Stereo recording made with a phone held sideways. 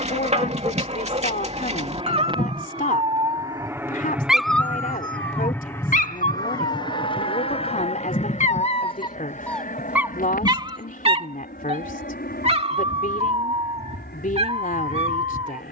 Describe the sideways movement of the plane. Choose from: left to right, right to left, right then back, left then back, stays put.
right to left.